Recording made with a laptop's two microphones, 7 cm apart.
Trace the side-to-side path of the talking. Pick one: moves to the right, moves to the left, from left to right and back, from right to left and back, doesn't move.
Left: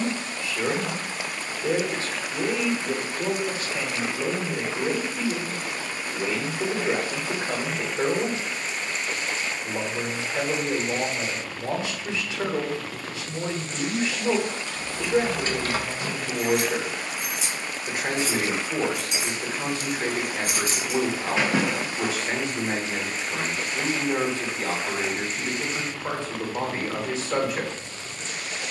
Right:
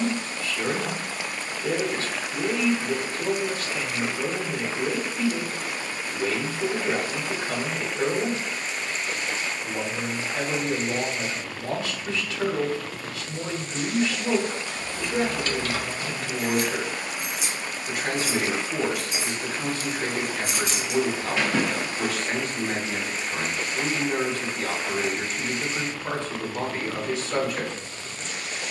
doesn't move.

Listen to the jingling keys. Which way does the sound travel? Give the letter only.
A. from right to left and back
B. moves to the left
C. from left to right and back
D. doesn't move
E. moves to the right
A.